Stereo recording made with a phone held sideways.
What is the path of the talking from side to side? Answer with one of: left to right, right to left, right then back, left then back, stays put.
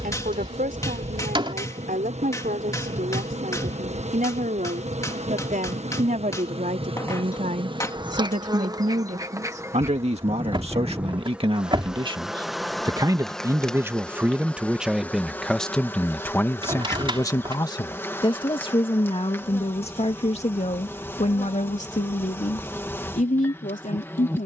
right to left.